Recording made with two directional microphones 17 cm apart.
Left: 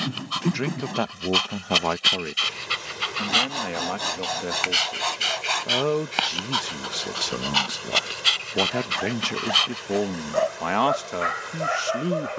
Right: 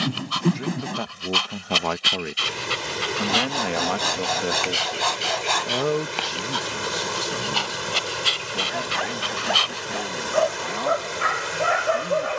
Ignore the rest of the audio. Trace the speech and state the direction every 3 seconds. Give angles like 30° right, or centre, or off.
20° left, 10° right, 30° left, 60° left.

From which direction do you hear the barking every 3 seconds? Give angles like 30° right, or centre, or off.
centre, 20° left, 20° left, 10° right.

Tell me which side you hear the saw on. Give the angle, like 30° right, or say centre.
20° right.